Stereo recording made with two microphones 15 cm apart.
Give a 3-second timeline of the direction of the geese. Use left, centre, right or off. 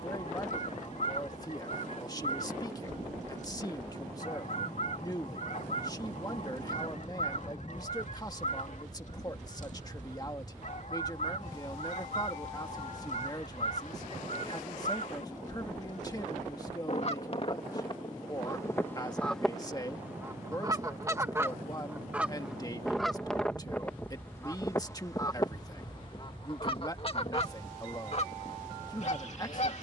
left, left, left, left, left, left, centre, centre, left, left.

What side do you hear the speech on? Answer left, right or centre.
left.